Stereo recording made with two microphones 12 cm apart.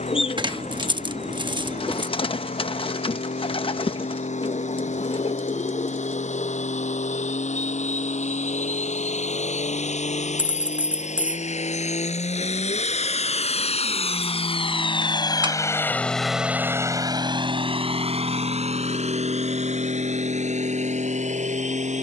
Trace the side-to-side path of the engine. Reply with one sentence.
In this clip you hear the engine move to the right.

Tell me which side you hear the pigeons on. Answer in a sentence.
You can hear the pigeons on the left.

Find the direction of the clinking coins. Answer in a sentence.
You can hear the clinking coins on the right.